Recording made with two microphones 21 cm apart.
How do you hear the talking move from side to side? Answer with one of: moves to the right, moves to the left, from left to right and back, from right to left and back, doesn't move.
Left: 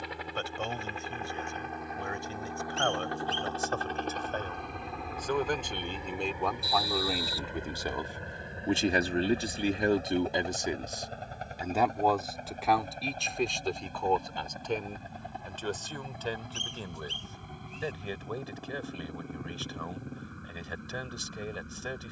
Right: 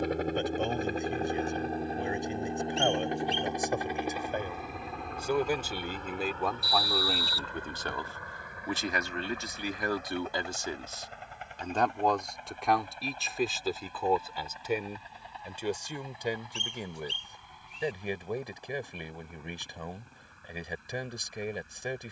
from right to left and back.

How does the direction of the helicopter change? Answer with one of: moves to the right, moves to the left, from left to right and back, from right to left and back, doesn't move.
moves to the left.